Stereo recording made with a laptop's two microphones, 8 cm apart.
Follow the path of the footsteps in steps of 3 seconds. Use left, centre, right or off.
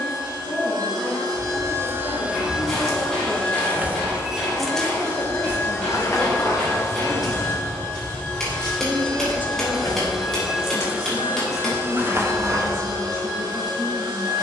right, centre, left, left, right.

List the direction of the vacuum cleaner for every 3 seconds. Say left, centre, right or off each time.
right, left, left, centre, right.